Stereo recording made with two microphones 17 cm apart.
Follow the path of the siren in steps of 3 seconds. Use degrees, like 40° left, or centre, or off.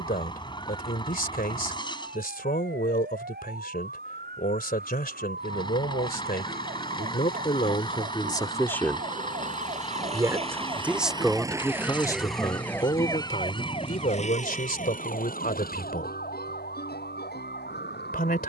70° right, 70° right, 60° right, 30° right, 30° left, 60° left.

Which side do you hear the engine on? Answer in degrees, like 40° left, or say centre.
30° left.